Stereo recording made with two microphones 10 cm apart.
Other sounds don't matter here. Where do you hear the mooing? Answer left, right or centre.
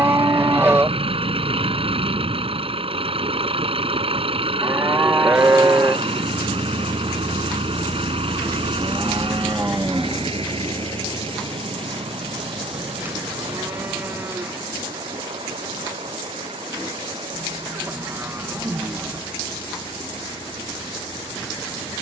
right.